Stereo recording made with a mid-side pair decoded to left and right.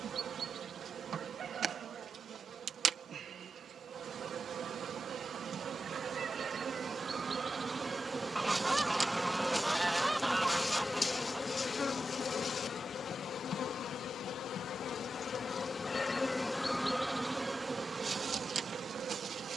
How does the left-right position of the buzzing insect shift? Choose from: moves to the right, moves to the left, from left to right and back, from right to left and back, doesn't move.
from right to left and back.